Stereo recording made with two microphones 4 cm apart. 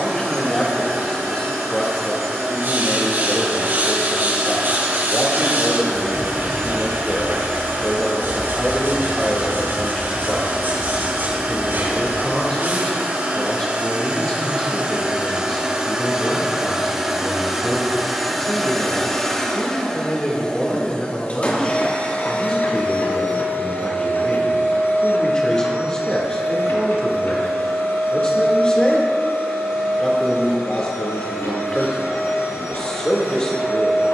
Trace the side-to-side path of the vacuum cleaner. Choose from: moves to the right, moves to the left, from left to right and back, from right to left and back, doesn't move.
moves to the left.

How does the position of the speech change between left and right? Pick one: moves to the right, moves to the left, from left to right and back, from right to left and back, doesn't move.
doesn't move.